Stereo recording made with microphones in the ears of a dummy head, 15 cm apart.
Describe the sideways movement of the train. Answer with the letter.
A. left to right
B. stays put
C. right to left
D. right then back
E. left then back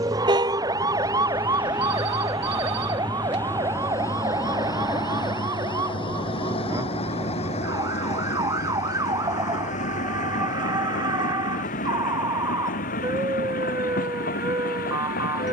C.